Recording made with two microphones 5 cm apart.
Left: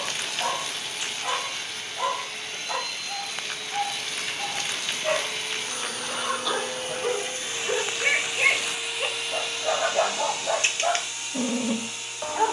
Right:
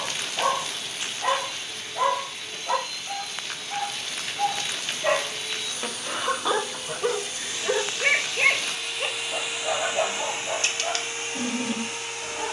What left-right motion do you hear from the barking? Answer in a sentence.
You can hear the barking move to the left.